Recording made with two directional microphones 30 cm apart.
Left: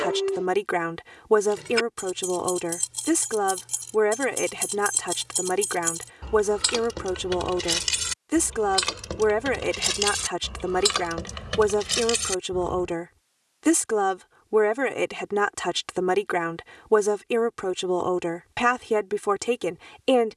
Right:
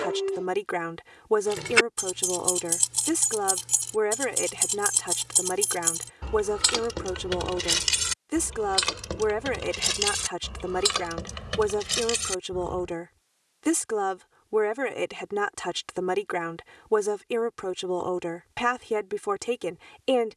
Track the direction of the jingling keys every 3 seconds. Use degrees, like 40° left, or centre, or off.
50° right, 30° right, 10° right, centre, 10° left, off, off.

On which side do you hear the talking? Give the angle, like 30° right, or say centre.
20° left.